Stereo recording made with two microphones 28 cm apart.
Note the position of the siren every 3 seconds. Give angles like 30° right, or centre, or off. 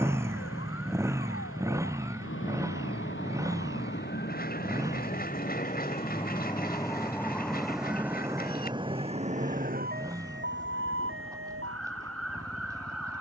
50° left, 40° left, centre, 40° right, 60° right.